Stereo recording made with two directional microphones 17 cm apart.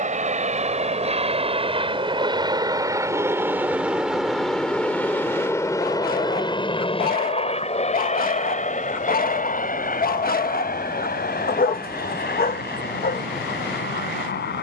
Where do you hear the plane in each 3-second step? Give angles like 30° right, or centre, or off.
40° right, centre, 30° left, 50° left, 60° left.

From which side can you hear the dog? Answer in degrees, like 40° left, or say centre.
60° left.